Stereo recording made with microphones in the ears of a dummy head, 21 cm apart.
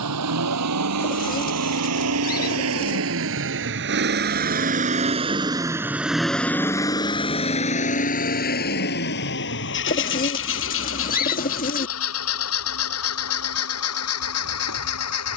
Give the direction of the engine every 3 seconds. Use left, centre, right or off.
right, right, left, left, left.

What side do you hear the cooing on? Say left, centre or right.
left.